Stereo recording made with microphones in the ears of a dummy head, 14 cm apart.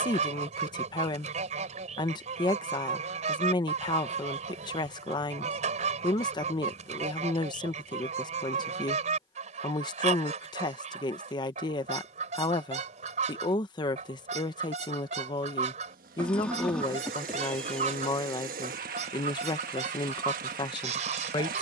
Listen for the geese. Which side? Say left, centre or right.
right.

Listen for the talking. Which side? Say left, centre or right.
left.